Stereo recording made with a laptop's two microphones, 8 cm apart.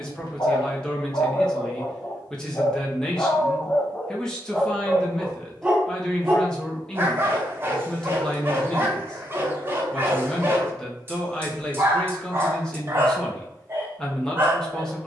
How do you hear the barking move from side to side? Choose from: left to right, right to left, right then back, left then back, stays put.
left to right.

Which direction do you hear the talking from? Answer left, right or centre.
centre.